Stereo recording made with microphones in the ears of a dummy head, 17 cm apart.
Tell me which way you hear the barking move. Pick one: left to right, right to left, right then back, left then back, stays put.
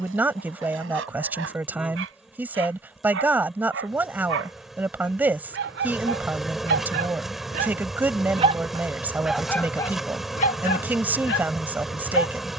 right to left.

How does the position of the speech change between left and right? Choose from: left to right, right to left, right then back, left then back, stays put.
stays put.